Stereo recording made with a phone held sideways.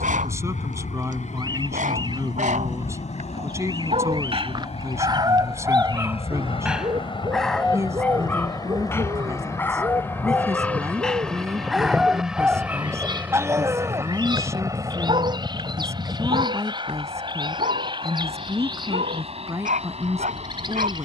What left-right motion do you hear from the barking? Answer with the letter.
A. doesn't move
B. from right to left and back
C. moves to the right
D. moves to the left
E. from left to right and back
B.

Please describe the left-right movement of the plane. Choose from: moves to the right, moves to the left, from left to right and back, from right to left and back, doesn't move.
moves to the right.